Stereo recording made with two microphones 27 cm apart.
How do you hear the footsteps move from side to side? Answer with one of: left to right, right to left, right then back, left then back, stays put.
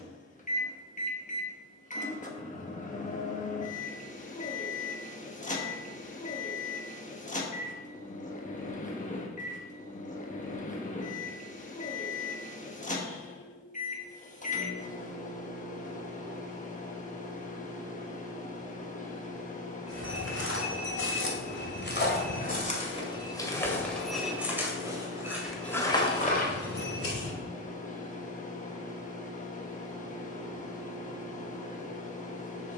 right then back.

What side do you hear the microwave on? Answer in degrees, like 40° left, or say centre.
30° left.